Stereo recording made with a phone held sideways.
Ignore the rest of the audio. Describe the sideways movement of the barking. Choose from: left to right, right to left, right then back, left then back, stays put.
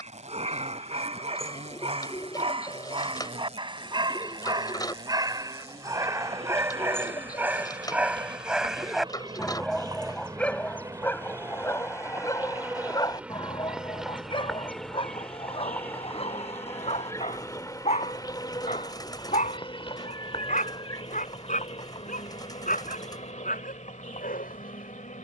right to left.